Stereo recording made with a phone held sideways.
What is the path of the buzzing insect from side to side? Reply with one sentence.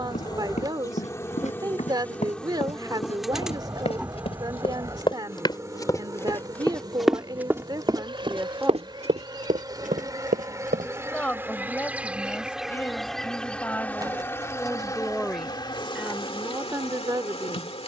You can hear the buzzing insect move from left to right and back again.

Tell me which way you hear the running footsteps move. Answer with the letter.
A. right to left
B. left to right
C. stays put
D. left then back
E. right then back
B.